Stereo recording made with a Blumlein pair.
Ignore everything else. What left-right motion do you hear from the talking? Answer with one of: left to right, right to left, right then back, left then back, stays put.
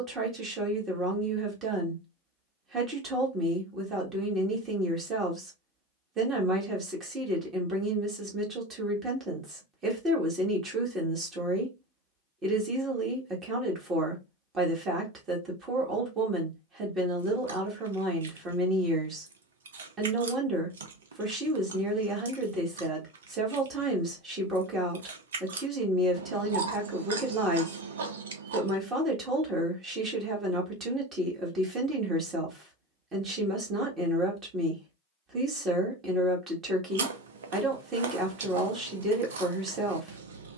stays put.